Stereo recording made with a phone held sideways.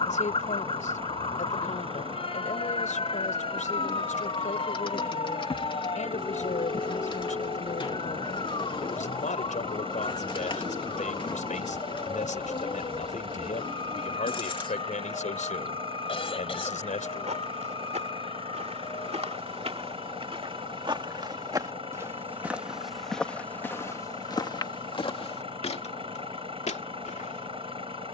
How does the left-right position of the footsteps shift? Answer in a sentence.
You can hear the footsteps move to the left.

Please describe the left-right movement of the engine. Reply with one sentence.
You can hear the engine stay in one place.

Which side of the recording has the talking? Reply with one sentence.
In this clip you hear the talking on the left.